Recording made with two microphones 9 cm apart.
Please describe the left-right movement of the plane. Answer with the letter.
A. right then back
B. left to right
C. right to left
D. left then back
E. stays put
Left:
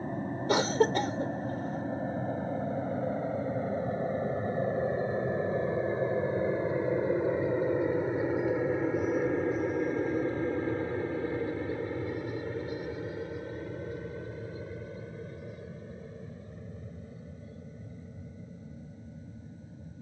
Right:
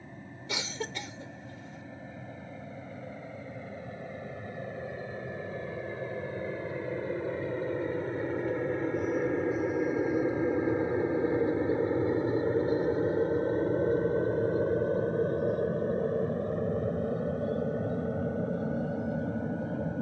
B.